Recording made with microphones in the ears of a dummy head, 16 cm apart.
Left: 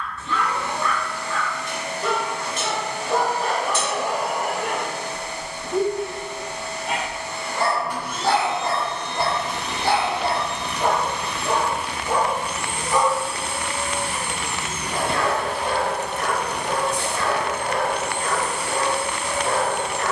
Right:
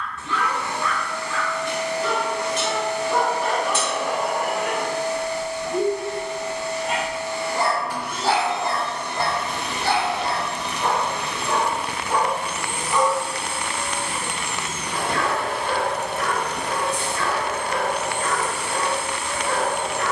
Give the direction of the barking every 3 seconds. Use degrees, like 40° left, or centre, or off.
40° left, 30° left, centre, 20° left, 30° left, 30° left, 30° left.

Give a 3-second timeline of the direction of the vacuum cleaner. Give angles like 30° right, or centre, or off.
20° right, 20° right, 20° right, 20° right, 10° left, 40° left, 70° left.